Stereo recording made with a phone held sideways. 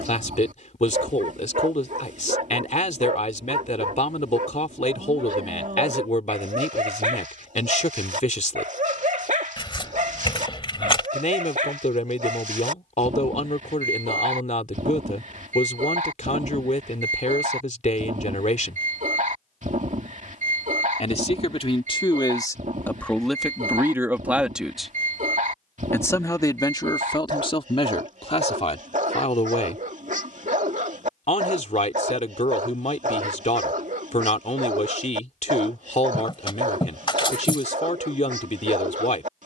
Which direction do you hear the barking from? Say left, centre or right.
right.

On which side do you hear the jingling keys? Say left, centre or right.
left.